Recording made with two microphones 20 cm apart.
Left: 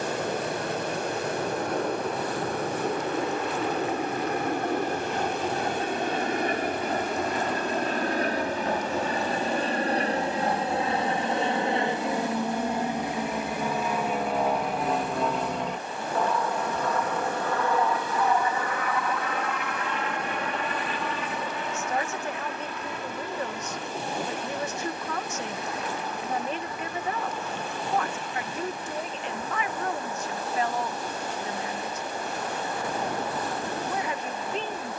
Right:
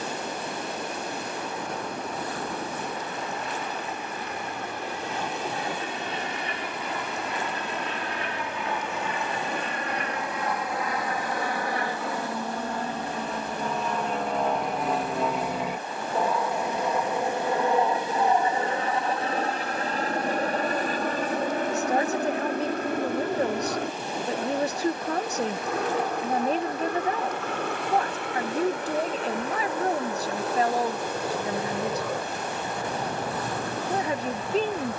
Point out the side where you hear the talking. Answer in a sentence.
In this clip you hear the talking on the right.